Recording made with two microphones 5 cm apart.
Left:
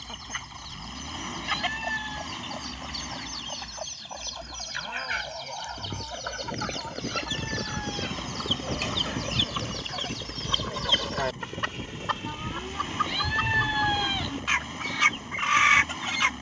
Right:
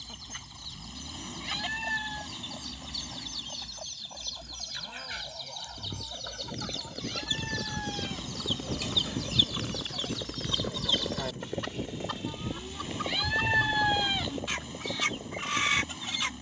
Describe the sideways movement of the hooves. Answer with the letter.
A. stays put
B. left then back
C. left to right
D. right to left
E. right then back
C.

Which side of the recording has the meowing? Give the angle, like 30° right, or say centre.
centre.